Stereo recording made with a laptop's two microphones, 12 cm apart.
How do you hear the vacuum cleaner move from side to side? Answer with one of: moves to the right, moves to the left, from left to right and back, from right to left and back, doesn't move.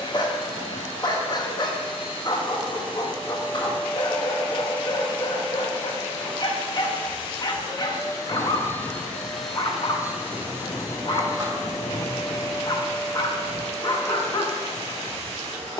moves to the right.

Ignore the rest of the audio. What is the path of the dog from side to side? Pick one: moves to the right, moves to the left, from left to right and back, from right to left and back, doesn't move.
doesn't move.